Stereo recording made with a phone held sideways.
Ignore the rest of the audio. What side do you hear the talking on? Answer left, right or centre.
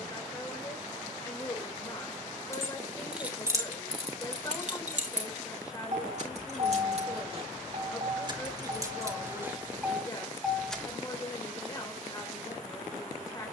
left.